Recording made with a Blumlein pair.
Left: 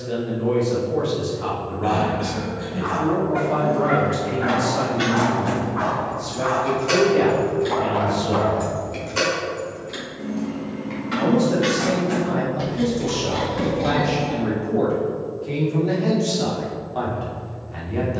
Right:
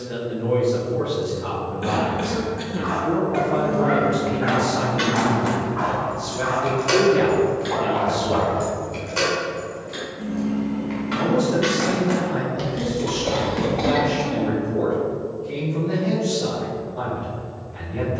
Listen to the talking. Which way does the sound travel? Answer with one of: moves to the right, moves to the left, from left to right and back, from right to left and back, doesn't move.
from left to right and back.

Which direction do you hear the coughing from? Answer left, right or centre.
right.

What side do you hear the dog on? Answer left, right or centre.
centre.